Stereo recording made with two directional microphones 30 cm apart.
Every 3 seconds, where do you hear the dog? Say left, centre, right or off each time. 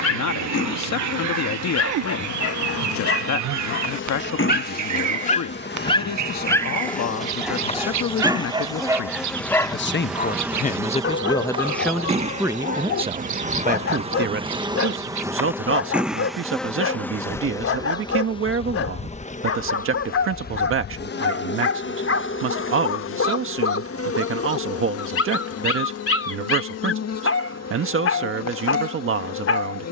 left, left, centre, left, left, left, left, left, left, left.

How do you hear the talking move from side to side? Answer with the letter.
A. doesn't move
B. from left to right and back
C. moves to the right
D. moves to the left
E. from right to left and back
C.